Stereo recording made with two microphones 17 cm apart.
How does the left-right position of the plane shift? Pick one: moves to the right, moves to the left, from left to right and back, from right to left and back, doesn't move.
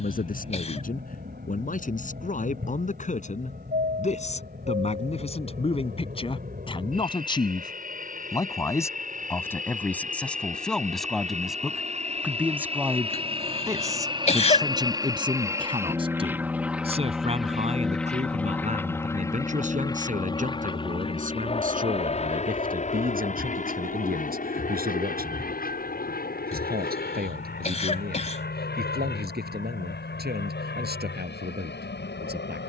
moves to the left.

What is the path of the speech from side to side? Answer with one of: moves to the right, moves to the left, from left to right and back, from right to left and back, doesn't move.
moves to the right.